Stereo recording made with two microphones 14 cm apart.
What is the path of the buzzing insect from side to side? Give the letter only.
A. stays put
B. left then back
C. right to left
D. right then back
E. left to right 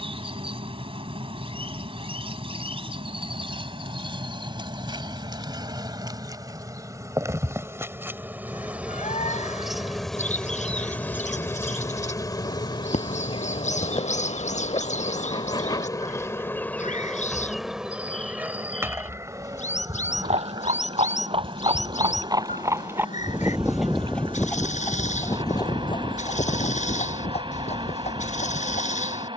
B.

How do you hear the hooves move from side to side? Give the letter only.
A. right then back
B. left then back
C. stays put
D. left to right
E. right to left
E.